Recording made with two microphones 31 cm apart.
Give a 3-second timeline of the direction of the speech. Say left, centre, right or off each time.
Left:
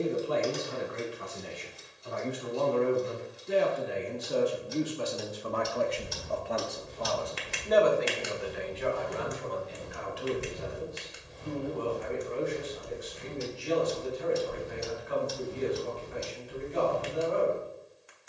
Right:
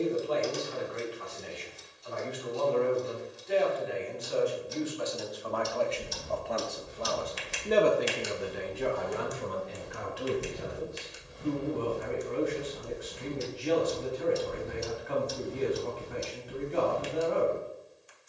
left, left, right, right, right, right.